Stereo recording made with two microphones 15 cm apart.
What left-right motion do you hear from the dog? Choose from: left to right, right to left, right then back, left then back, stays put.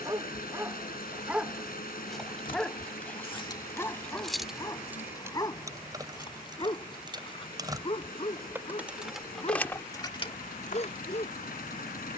right to left.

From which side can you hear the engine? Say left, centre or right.
left.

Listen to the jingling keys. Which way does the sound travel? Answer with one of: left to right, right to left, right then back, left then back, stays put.
right then back.